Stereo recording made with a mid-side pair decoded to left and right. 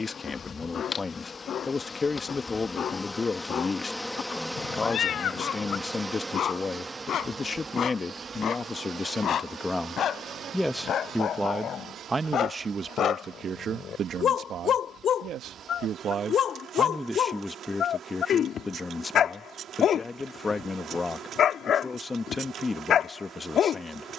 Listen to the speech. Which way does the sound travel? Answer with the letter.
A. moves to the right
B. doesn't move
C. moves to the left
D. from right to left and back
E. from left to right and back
E.